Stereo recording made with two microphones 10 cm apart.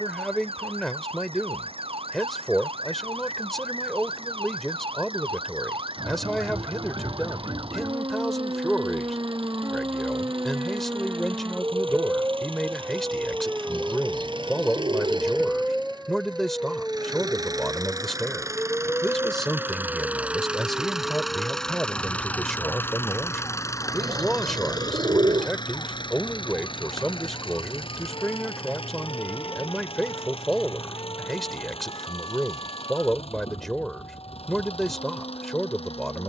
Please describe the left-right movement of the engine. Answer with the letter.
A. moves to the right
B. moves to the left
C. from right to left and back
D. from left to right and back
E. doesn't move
B.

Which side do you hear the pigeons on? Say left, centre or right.
right.